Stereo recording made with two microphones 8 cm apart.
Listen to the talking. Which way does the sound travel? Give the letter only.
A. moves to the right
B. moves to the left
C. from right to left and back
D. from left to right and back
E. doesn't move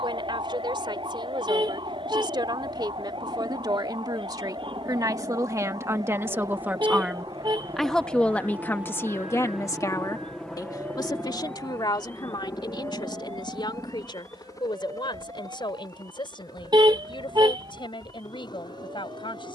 B.